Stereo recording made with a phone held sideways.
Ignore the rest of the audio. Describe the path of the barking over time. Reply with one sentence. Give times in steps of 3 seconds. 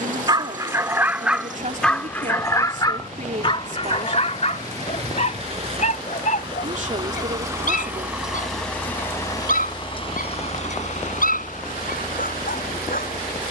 In this clip you hear the barking in the centre from 0 s and on the left from 3 s.